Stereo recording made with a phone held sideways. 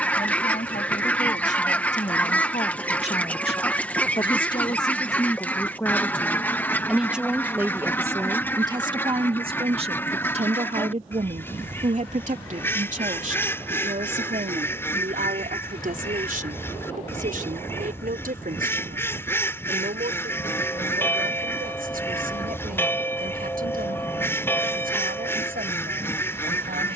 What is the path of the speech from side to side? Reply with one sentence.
You can hear the speech go from the left side to the right.